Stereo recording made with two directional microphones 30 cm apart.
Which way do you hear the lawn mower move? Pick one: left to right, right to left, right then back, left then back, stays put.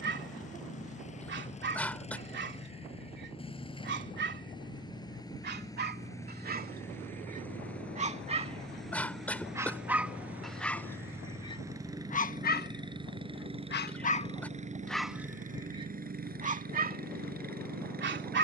left to right.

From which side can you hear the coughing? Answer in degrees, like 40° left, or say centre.
centre.